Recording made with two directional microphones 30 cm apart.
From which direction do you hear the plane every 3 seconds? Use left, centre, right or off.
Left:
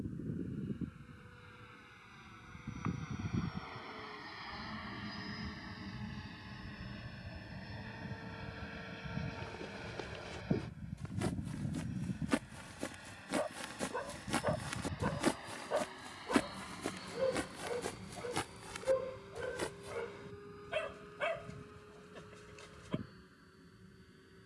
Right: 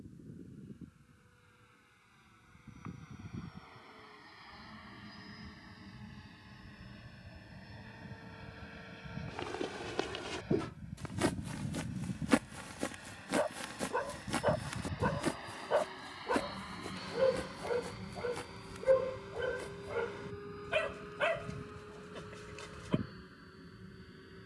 left, left, left, centre, centre, right, right, right.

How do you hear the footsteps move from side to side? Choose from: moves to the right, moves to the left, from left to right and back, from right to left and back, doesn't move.
moves to the left.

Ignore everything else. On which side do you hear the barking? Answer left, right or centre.
right.